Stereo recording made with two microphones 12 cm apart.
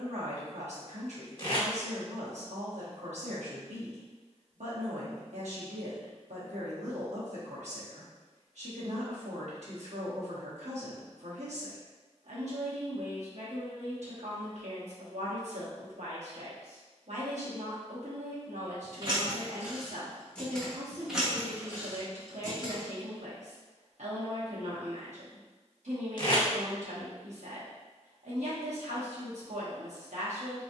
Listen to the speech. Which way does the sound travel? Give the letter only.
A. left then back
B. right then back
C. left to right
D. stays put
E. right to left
D.